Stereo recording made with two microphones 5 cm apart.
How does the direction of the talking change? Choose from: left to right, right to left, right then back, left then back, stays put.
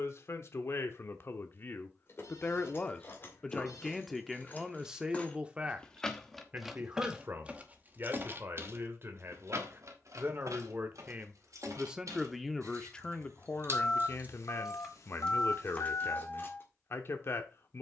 right then back.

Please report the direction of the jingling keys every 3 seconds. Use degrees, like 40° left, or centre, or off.
50° left, 30° left, 20° right, 70° right, 50° right, 30° left.